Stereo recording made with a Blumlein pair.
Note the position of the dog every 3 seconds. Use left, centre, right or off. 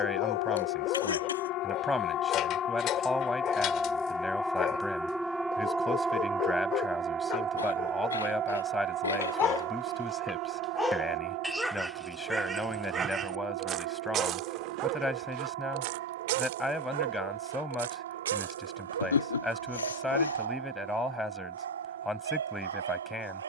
left, left, left, centre, right, right, right, right.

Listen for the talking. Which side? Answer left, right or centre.
centre.